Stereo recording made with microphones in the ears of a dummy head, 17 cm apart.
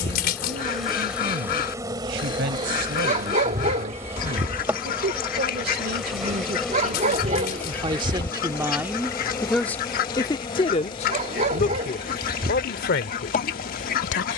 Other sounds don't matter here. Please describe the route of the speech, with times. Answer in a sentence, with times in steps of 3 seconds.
You can hear the speech on the right from 0 s and on the left from 9 s.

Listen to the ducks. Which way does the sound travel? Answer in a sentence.
You can hear the ducks stay in one place.